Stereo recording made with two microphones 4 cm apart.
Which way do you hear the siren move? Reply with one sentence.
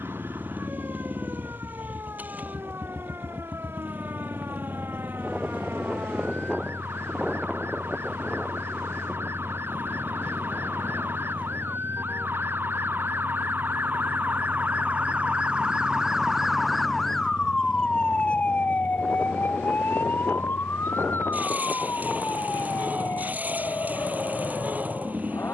In this clip you hear the siren move to the left.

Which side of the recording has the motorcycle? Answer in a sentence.
In this clip you hear the motorcycle on the right.